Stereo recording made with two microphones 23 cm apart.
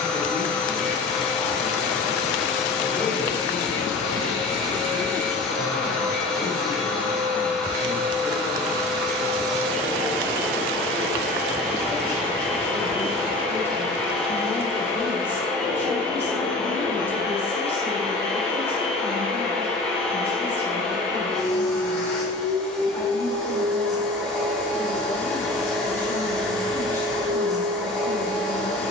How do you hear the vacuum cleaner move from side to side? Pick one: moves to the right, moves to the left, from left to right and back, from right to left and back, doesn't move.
doesn't move.